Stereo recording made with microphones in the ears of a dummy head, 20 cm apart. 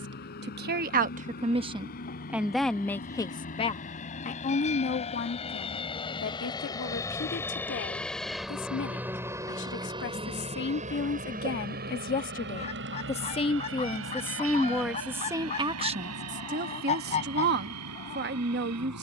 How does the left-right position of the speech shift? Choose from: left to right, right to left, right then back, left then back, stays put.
left then back.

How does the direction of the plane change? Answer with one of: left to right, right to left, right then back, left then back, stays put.
left to right.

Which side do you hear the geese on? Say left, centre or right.
left.